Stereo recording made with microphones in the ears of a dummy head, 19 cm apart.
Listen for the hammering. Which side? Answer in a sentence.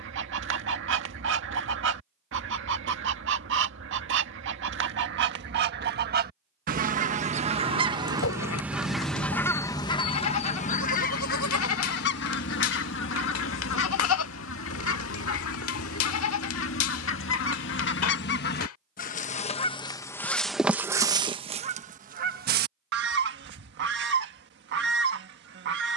In this clip you hear the hammering on the left.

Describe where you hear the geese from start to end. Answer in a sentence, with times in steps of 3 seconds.
You can hear the geese on the right from 0 s, on the left from 9 s and on the right from 21 s.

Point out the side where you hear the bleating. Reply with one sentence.
In this clip you hear the bleating on the left.